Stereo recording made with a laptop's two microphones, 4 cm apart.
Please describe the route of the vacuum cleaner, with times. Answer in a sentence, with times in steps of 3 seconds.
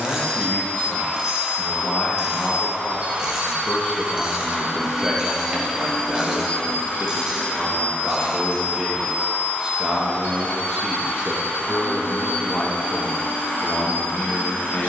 In this clip you hear the vacuum cleaner on the right from 0 s, in the centre from 3 s and on the left from 6 s.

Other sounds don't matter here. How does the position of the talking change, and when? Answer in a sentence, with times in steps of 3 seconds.
In this clip you hear the talking on the left from 0 s, in the centre from 3 s, on the right from 6 s, in the centre from 9 s and on the left from 12 s.